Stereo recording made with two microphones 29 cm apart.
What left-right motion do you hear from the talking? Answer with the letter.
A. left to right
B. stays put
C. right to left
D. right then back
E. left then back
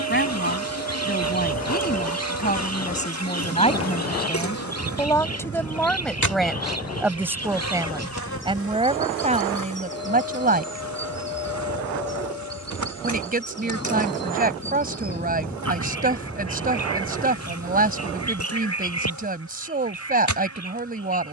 A.